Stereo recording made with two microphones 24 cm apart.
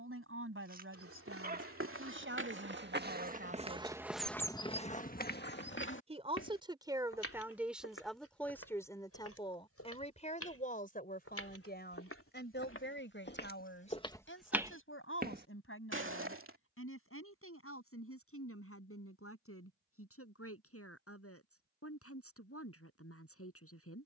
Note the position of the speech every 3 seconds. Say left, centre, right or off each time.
right, right, centre, left, left, left, left, left.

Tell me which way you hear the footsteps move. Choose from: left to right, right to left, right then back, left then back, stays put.
left then back.